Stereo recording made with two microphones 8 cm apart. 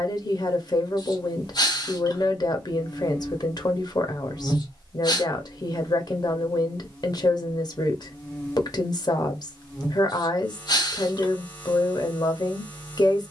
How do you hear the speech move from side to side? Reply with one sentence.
In this clip you hear the speech stay in one place.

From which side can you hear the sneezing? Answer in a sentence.
You can hear the sneezing on the left.